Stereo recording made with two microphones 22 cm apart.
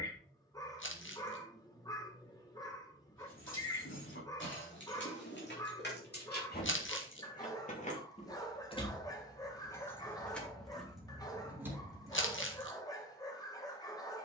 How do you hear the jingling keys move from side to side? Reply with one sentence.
You can hear the jingling keys move to the right.